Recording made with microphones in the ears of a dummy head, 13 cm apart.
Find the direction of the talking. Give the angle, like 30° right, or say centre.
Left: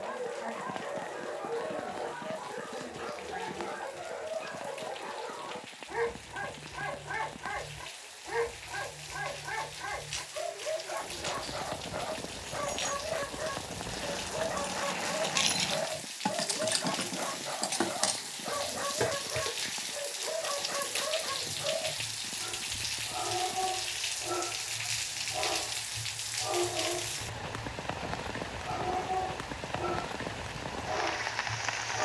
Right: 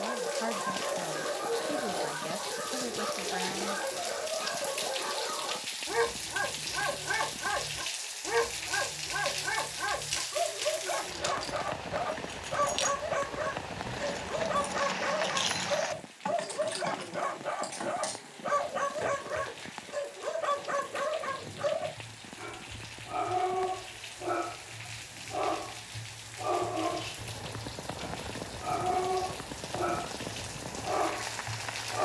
60° right.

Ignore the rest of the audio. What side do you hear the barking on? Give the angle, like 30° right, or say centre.
70° right.